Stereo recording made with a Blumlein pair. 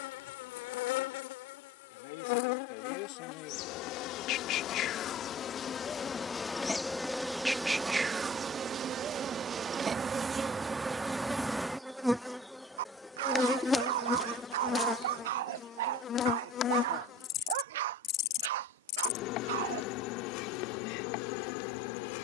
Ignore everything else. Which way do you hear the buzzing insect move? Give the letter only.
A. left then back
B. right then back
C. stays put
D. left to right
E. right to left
B.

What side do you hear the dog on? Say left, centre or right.
right.